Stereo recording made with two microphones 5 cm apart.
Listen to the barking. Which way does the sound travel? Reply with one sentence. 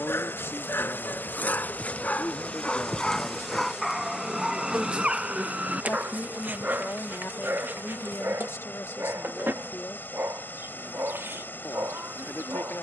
In this clip you hear the barking go from the left side to the right.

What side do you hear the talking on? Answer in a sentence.
You can hear the talking on the left.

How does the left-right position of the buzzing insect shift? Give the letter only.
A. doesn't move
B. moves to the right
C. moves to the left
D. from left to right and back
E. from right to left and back
B.